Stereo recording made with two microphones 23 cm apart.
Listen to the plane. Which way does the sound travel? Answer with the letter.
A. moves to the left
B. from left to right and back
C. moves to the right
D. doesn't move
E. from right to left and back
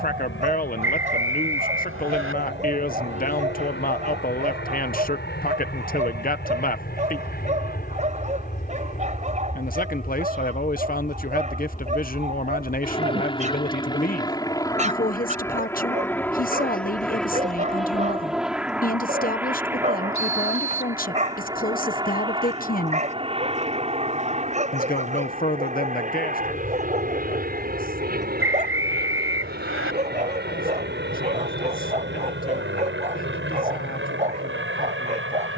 C.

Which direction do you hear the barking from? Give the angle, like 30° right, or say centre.
30° right.